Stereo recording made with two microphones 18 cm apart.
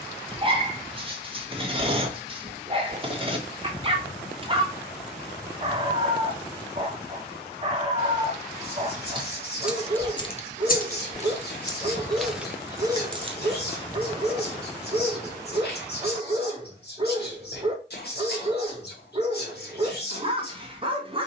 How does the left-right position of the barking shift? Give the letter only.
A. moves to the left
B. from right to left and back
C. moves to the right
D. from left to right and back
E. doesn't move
E.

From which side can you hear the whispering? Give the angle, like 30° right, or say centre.
60° left.